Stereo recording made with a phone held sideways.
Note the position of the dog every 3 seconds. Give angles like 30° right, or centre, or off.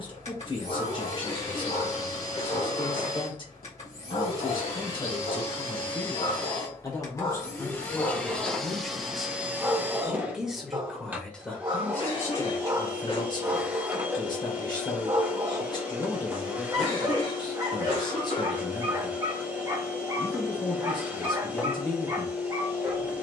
70° left, 70° left, 30° left, 20° right, 30° right, 30° right, 30° right, 30° right.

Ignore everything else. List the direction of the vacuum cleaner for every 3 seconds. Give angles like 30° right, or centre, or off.
40° left, 40° left, 20° left, 10° right, 10° right, 10° right, 10° right, 10° right.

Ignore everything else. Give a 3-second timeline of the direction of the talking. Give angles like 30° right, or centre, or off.
30° left, 30° left, 10° left, centre, 30° left, 30° left, 30° left, 30° left.